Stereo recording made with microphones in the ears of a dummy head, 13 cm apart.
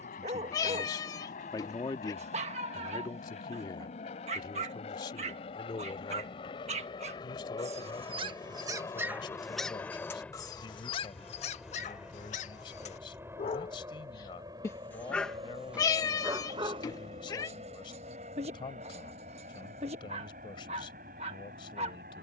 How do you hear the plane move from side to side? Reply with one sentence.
You can hear the plane move from left to right.